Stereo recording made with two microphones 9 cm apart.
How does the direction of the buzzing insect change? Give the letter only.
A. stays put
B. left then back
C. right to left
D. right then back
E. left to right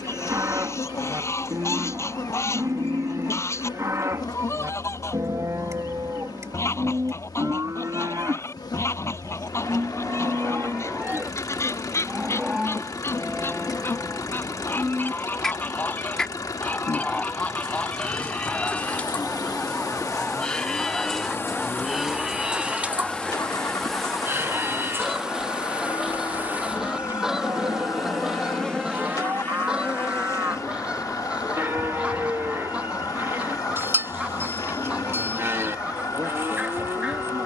D.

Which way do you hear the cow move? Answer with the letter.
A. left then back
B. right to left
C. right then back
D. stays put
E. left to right
A.